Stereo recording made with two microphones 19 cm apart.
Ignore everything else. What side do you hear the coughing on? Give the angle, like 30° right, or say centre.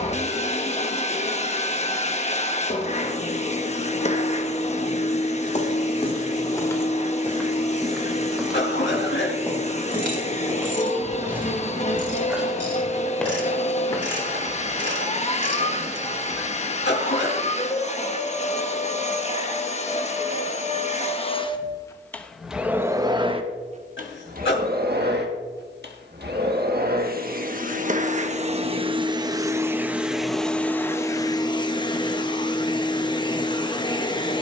70° left.